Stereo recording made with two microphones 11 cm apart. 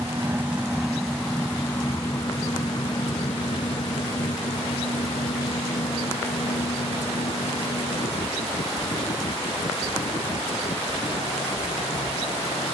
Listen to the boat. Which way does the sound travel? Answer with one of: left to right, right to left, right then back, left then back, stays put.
right to left.